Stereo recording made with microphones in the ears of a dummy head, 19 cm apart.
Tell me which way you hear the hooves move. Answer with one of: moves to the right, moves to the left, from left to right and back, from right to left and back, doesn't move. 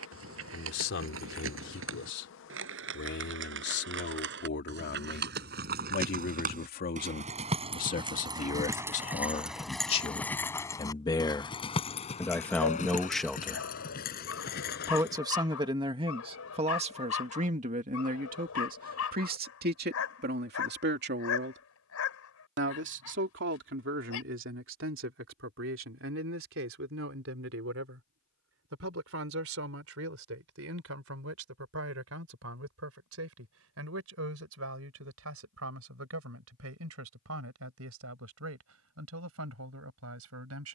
moves to the left.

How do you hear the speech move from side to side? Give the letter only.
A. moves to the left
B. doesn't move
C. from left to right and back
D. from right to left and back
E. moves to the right
E.